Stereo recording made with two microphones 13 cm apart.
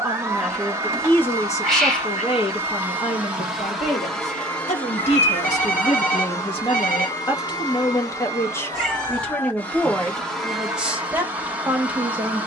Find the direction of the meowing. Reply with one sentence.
You can hear the meowing in the centre.